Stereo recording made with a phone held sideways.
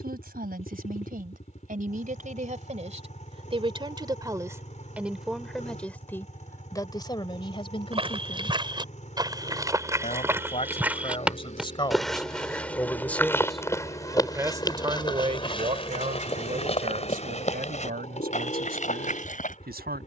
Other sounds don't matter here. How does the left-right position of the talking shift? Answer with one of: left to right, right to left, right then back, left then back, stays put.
left then back.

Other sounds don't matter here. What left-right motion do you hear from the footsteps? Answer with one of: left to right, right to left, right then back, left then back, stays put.
right to left.